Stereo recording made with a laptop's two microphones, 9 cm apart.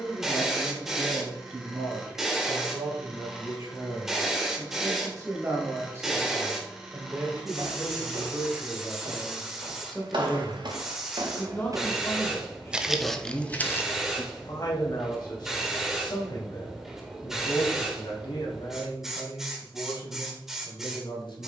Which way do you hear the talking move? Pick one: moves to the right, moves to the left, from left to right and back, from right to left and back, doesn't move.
moves to the left.